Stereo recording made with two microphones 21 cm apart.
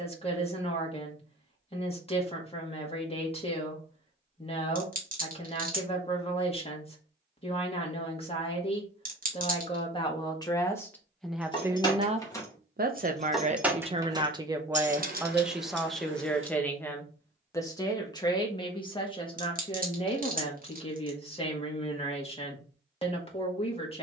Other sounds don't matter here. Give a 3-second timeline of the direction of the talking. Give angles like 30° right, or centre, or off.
30° left, 30° left, 30° left, 10° left, 30° right, 10° left, 20° left, 30° left.